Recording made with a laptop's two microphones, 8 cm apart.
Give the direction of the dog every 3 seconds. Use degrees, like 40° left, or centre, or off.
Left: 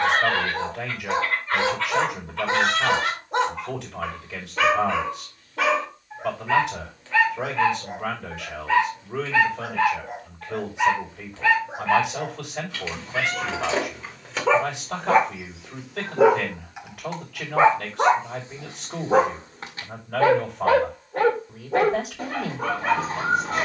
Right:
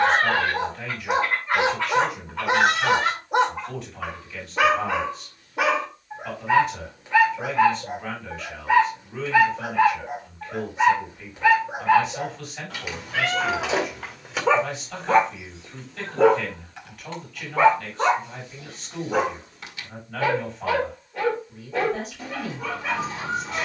20° right, 20° right, 20° right, 20° right, 10° right, 10° left, 30° left, 40° left.